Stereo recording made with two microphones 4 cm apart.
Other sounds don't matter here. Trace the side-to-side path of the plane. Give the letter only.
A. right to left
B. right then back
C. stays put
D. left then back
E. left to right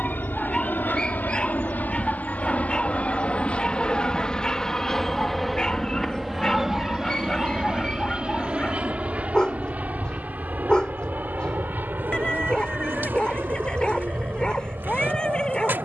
E.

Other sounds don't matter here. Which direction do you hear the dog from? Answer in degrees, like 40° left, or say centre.
20° left.